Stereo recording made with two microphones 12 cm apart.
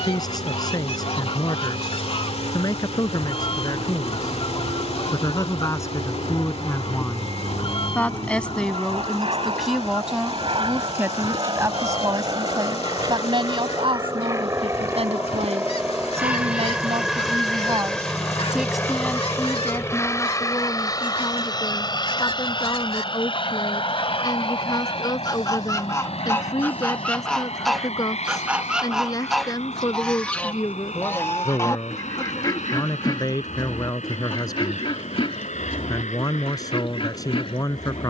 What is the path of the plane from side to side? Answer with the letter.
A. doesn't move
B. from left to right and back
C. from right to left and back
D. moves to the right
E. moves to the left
E.